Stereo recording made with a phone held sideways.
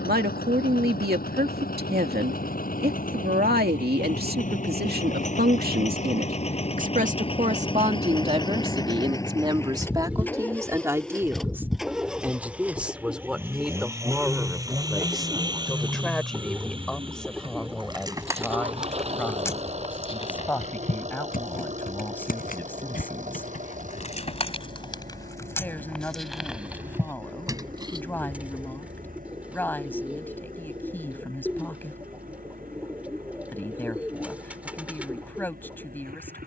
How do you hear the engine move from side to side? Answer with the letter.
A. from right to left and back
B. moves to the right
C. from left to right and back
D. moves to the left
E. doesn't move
B.